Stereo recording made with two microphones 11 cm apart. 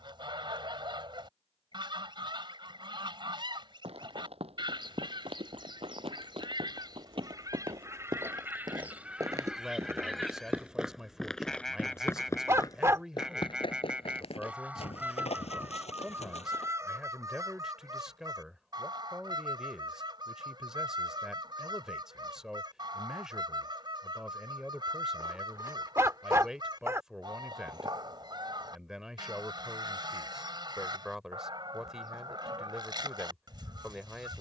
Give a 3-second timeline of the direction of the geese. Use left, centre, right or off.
right, right, right, centre, centre, right, right, right, right, right, right, right.